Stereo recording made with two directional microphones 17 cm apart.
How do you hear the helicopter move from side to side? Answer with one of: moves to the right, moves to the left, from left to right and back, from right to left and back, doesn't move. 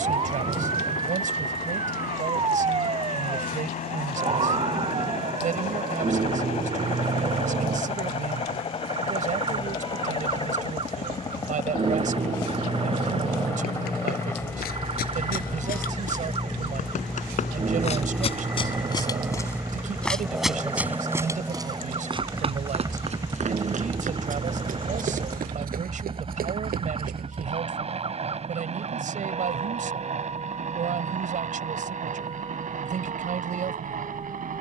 moves to the right.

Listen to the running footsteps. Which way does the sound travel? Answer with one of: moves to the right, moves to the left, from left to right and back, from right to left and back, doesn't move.
moves to the right.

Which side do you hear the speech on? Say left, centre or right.
right.